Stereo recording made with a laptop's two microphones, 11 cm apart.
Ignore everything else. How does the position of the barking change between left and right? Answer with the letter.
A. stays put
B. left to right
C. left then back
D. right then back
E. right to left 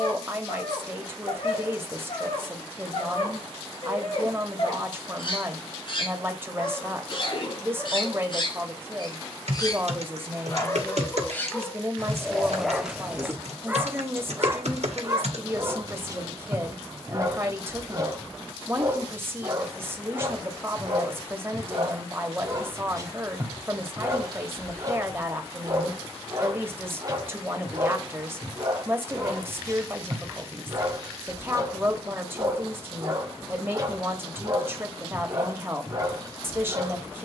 B.